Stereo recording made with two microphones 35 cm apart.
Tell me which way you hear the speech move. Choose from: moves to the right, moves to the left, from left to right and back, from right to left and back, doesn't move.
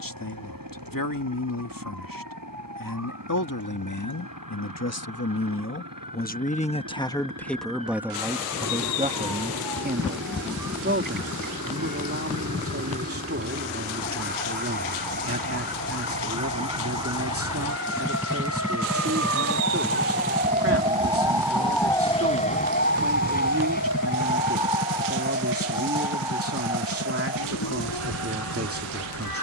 moves to the right.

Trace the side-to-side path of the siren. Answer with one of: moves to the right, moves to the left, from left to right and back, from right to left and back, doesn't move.
moves to the left.